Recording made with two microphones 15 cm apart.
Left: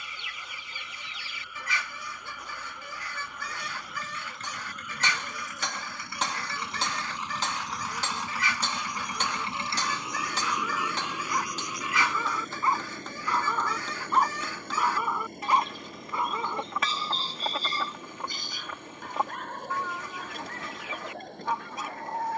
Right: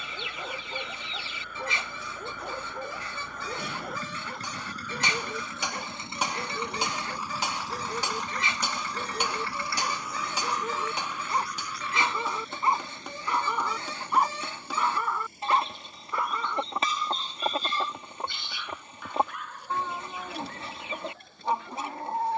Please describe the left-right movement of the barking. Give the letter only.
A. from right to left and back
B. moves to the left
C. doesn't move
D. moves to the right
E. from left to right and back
B.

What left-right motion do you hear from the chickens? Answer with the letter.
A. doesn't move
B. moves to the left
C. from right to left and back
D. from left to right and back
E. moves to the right
A.